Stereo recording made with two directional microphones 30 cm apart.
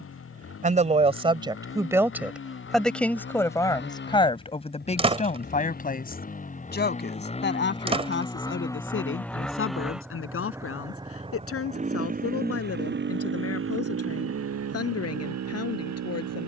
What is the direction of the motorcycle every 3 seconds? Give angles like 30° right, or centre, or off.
50° left, 40° left, 20° left, 10° right, 40° right, 60° right.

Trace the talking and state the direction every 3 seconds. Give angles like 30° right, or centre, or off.
10° right, 20° left, 40° left, 50° left, 50° left, 50° left.